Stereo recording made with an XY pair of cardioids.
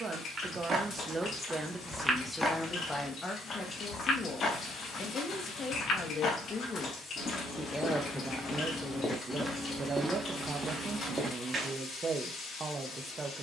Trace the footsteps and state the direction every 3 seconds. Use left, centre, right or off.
centre, left, left, centre, off.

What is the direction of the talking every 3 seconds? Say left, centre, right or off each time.
centre, left, centre, right, right.